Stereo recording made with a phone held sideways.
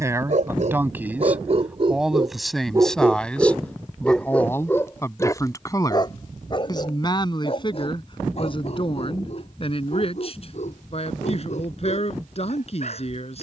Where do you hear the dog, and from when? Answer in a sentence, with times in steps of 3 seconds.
In this clip you hear the dog on the right from 0 s, in the centre from 3 s and on the left from 6 s.